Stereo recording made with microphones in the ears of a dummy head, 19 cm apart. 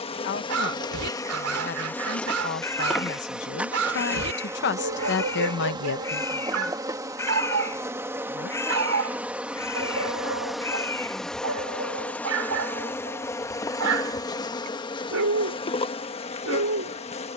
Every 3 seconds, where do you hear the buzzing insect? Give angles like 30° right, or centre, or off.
10° left, 10° right, 10° right, centre, 10° left, 30° left.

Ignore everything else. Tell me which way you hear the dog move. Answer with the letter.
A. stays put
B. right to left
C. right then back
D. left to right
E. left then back
A.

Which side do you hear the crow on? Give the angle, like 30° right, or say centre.
10° left.